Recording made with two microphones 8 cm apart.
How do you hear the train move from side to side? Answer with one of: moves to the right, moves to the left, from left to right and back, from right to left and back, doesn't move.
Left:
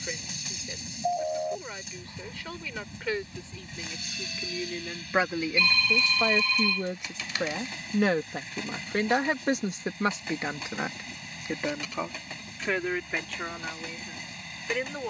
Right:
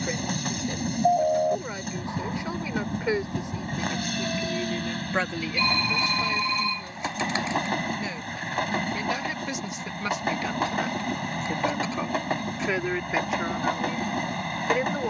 doesn't move.